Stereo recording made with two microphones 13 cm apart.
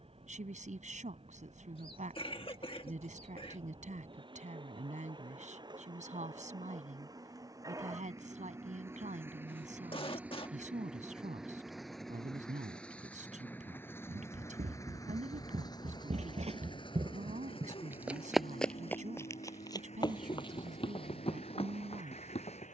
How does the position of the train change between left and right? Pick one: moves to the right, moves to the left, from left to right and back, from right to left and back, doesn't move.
moves to the left.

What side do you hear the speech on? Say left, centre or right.
right.